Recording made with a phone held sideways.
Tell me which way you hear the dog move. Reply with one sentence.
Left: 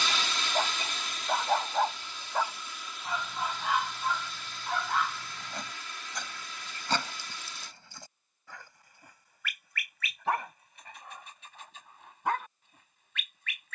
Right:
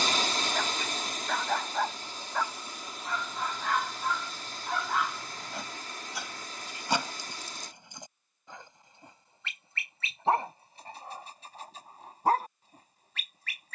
You can hear the dog move to the right.